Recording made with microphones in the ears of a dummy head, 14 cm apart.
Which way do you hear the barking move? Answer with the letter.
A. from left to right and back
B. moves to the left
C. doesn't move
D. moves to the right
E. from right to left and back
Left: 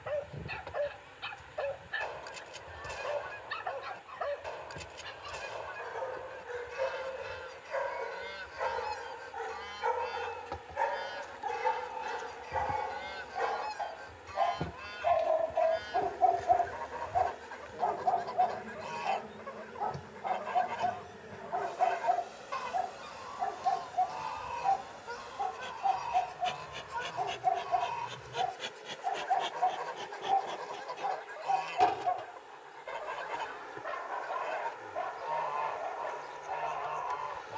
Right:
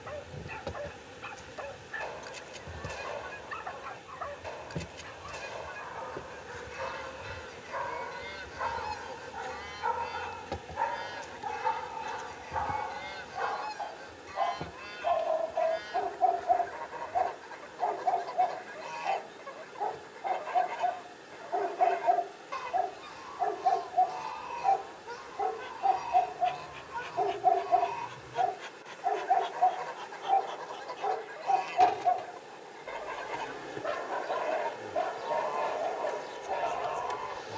D.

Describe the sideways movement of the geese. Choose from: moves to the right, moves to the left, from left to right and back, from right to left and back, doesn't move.
doesn't move.